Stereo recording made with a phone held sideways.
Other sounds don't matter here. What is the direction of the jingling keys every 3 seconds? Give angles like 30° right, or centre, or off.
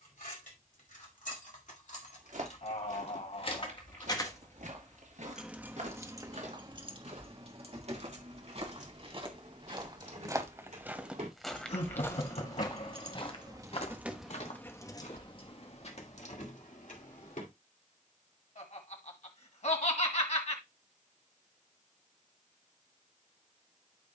60° left, 20° left, 40° right, 60° right, 20° right, 60° left, off, off.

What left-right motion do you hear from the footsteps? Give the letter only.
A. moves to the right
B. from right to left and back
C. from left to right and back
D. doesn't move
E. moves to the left
E.